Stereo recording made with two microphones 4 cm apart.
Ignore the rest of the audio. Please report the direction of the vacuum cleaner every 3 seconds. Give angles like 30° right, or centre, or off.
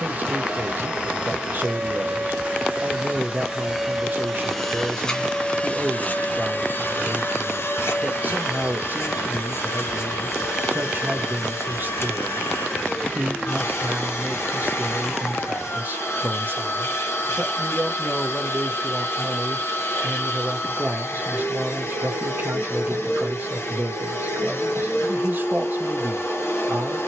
30° right, centre, 60° left, 70° left, 70° left, 70° left, 70° left, 70° left, 70° left.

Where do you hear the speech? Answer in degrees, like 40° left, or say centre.
40° right.